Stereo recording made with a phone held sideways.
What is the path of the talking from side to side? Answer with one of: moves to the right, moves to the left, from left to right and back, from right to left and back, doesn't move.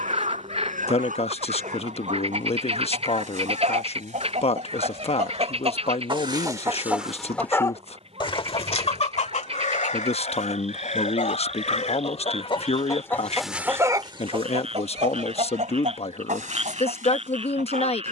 doesn't move.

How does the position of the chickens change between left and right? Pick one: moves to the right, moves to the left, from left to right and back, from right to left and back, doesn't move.
from right to left and back.